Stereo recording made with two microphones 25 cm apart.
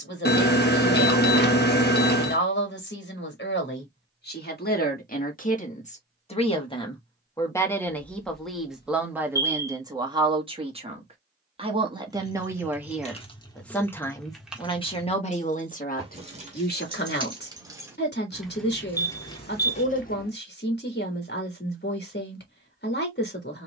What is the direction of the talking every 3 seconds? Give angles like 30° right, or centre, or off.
50° left, 40° left, 10° left, 20° right, centre, 40° left, 40° left, 40° left.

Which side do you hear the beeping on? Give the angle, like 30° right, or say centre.
40° left.